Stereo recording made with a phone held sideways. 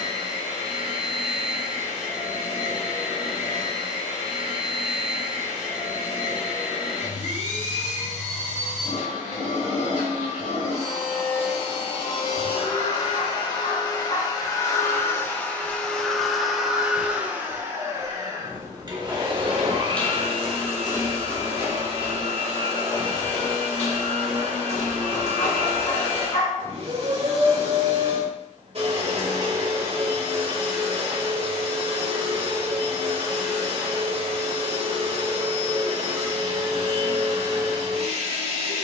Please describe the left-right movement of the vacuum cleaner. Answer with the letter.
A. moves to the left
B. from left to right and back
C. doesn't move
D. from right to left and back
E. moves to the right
E.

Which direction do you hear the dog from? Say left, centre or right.
left.